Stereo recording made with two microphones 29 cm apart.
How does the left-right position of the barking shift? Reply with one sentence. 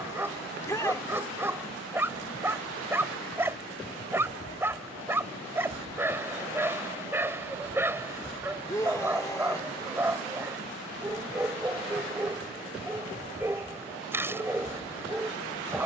In this clip you hear the barking stay in one place.